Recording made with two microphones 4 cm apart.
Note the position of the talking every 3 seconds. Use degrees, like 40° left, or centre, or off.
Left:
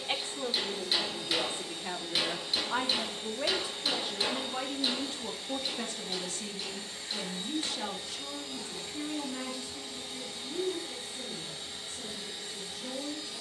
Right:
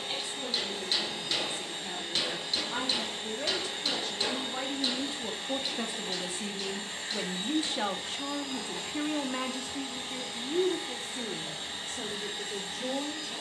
30° left, centre, 30° right, 60° right, 70° right.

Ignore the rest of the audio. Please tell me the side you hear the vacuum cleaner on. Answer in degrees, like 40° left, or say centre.
50° right.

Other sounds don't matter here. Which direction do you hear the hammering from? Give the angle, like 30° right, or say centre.
centre.